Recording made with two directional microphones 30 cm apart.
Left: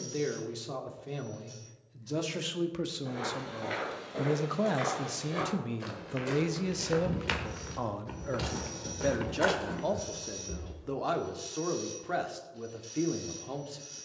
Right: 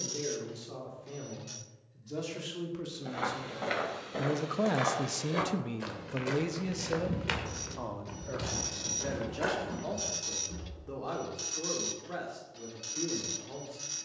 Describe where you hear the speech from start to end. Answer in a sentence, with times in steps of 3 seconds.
You can hear the speech on the left from 0 s, in the centre from 3 s and on the left from 6 s.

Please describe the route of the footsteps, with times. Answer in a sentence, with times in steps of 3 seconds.
You can hear the footsteps not at all from 0 s, on the right from 3 s, in the centre from 6 s, on the left from 9 s and not at all from 12 s.